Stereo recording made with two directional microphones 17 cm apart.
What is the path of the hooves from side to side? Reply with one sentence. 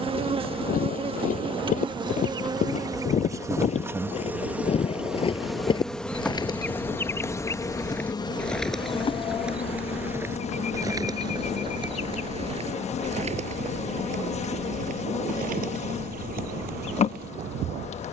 You can hear the hooves travel towards the right.